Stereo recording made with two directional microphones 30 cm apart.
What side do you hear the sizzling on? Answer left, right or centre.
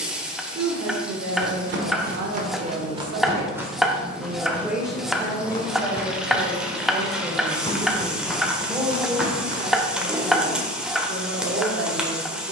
centre.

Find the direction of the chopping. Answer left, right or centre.
centre.